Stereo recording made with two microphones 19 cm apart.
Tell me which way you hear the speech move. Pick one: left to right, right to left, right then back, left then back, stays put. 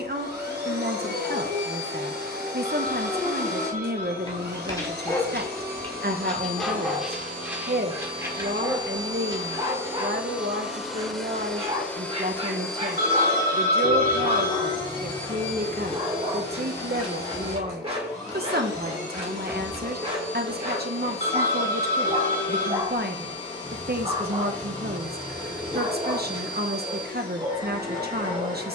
stays put.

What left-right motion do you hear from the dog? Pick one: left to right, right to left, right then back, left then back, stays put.
left to right.